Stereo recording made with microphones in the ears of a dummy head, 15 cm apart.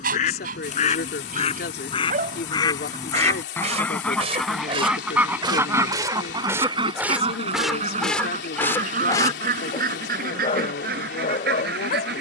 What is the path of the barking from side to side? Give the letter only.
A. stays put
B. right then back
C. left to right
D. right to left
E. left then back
D.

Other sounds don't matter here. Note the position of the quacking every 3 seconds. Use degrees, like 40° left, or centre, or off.
40° left, centre, 40° right, 60° right.